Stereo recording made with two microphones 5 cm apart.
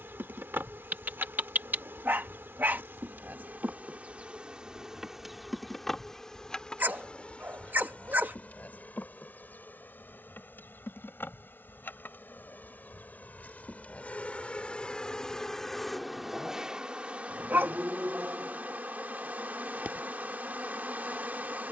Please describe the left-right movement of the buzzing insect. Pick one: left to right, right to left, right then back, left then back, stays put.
left then back.